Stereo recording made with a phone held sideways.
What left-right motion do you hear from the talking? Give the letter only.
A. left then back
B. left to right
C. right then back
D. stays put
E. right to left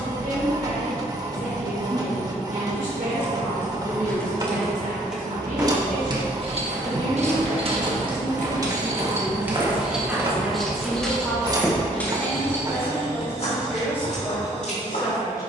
E.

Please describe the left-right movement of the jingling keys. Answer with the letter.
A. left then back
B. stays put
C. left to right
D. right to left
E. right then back
E.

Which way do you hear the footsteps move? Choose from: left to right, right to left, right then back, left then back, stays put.
right to left.